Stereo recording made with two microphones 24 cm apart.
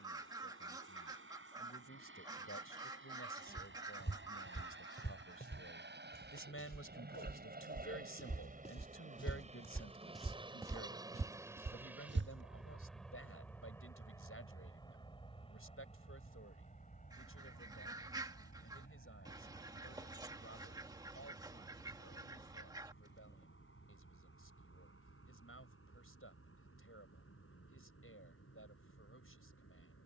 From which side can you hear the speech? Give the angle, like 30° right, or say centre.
70° left.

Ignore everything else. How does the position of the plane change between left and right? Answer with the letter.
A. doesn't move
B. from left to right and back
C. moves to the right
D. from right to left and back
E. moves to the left
E.